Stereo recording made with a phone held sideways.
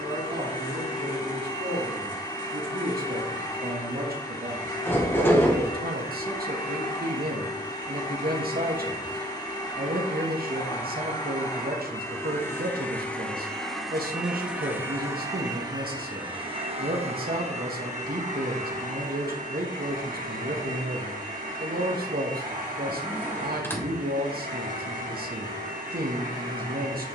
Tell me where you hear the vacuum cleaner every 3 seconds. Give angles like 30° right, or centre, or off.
30° left, 30° left, 30° left, 30° left, centre, 30° right, 60° right, 60° right, 60° right.